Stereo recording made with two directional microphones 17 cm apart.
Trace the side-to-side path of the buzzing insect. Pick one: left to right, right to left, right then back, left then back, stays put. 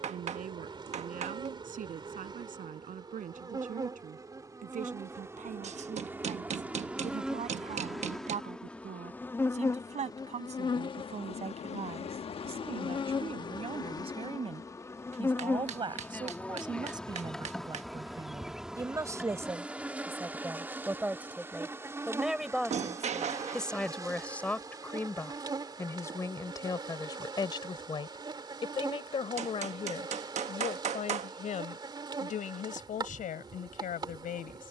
left then back.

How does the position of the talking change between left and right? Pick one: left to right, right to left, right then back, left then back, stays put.
right to left.